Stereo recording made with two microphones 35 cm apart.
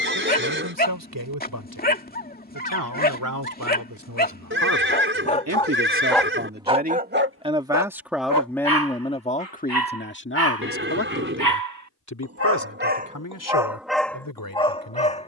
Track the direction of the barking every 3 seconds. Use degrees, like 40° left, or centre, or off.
20° left, 20° left, 40° right, 70° right, 10° right.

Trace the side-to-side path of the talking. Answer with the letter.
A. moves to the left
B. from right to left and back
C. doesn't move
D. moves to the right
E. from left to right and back
A.